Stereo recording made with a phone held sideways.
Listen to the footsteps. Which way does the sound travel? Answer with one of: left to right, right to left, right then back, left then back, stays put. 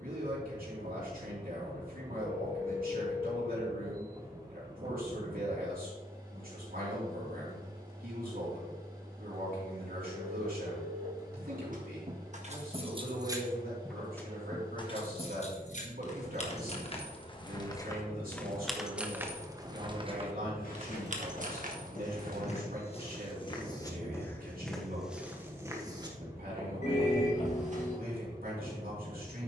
left to right.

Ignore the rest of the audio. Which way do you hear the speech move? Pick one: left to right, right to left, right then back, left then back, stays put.
stays put.